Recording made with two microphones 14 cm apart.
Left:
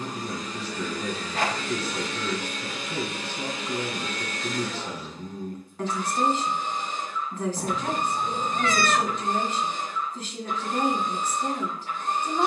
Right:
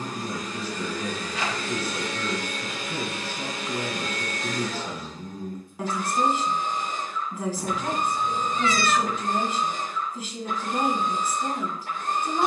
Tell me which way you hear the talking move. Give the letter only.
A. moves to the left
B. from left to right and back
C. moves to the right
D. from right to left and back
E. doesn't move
E.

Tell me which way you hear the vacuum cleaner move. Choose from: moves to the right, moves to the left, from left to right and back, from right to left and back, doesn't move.
doesn't move.